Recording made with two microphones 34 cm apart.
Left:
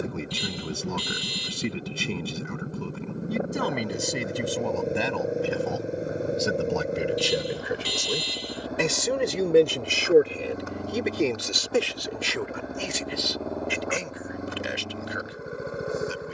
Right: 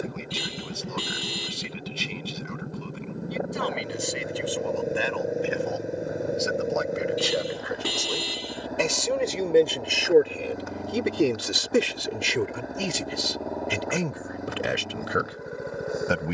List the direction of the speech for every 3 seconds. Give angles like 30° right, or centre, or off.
60° left, 50° left, 40° left, centre, 60° right, 70° right.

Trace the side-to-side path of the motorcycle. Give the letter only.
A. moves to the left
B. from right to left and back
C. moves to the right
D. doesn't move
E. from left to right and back
D.